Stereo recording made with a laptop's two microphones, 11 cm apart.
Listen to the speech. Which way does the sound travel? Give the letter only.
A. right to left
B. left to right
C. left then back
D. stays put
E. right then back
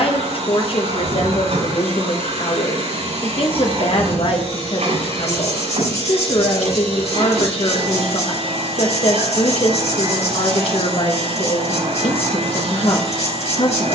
D.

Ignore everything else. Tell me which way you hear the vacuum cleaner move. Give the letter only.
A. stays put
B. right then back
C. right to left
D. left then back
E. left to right
A.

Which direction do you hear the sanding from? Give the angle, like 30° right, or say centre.
80° left.